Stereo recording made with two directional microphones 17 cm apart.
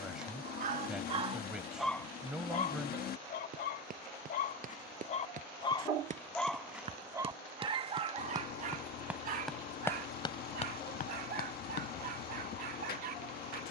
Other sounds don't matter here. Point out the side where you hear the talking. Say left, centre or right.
centre.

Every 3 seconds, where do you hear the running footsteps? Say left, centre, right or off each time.
off, right, right, left, off.